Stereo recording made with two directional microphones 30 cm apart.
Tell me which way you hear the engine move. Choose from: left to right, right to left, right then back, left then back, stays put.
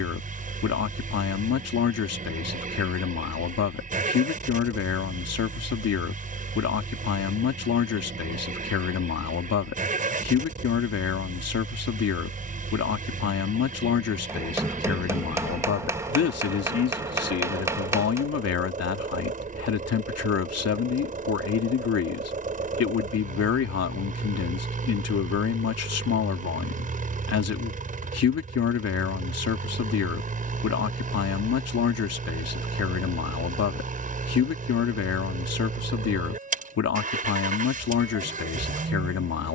stays put.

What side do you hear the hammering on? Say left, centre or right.
centre.